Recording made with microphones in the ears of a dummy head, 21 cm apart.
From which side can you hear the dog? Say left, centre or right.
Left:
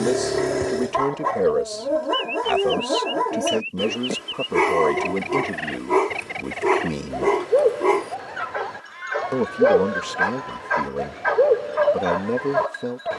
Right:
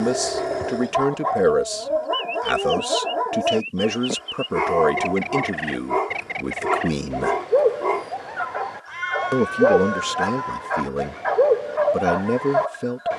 left.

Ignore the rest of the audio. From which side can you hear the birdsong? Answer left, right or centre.
centre.